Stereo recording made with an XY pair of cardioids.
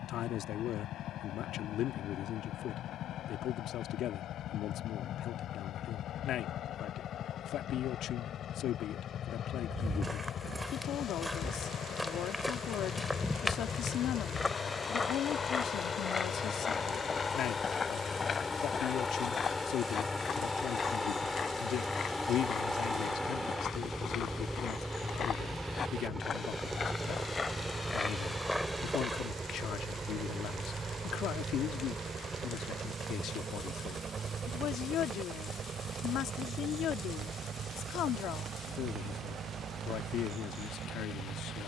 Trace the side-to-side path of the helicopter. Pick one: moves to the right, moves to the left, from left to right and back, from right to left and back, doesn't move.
moves to the right.